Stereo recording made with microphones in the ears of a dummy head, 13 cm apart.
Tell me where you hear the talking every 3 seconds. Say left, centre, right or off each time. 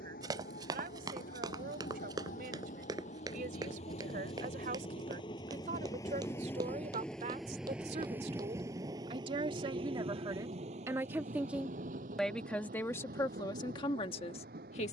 right, right, right, right, left.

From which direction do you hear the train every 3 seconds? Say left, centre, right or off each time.
left, left, centre, right, right.